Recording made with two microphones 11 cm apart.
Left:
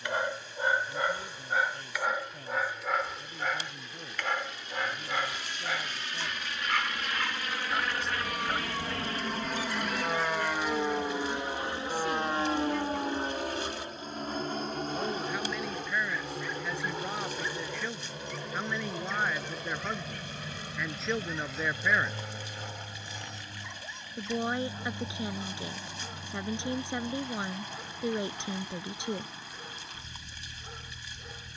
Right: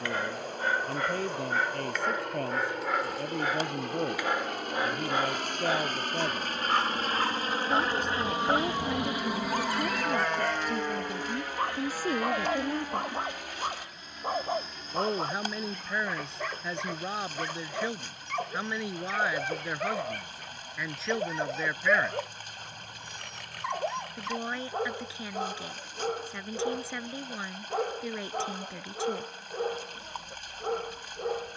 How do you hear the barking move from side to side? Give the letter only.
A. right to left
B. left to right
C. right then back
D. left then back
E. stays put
B.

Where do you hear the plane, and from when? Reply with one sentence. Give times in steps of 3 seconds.
You can hear the plane on the right from 0 s, in the centre from 9 s and on the left from 12 s.